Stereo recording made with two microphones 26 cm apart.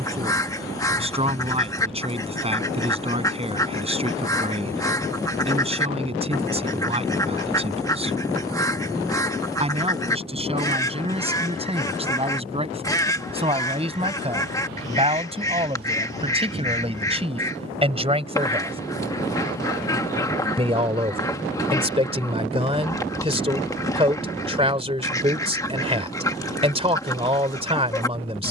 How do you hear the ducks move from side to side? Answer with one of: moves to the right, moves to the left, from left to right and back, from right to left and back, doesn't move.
doesn't move.